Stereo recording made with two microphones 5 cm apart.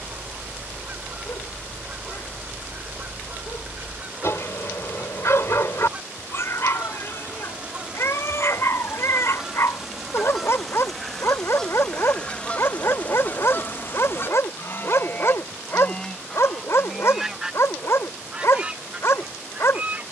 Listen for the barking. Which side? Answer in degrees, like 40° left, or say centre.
60° left.